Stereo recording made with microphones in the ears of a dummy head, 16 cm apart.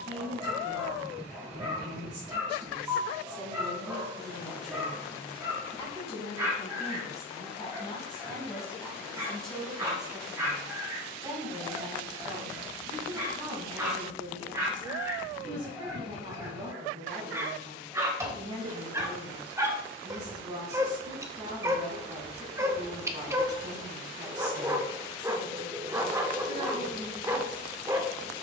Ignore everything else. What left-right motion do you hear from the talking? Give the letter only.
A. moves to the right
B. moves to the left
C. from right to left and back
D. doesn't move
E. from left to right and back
C.